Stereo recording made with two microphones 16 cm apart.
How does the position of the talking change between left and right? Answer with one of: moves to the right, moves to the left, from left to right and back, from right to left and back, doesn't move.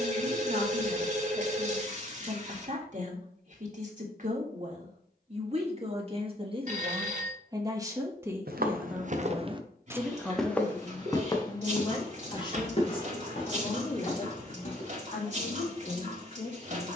moves to the left.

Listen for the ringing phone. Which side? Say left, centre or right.
right.